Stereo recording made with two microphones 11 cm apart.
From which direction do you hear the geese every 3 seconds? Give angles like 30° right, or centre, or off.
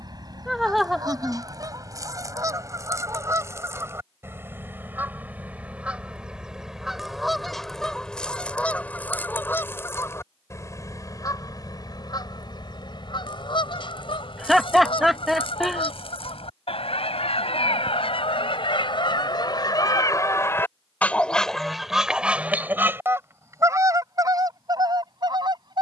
40° right, 20° right, centre, 30° left, 50° left, 60° left, 40° left, 10° right, 40° right.